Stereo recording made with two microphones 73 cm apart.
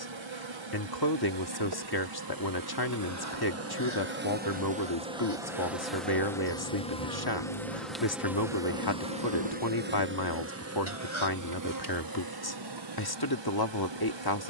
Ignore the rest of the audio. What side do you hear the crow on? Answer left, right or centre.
left.